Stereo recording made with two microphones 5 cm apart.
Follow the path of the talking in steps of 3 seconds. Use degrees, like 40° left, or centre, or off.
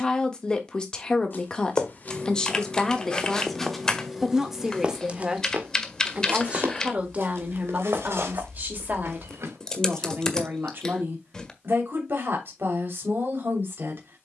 10° left, 10° right, 30° right, 50° right, 50° right.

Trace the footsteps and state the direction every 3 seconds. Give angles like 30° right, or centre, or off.
30° left, 10° right, 60° right, 70° right, off.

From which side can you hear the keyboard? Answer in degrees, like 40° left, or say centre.
10° left.